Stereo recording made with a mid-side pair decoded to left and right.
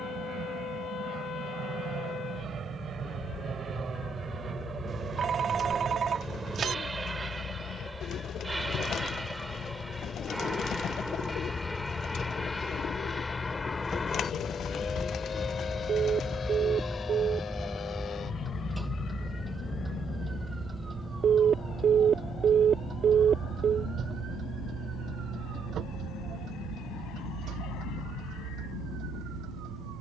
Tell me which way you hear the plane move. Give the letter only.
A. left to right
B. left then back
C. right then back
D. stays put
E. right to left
E.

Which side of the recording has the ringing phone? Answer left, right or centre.
right.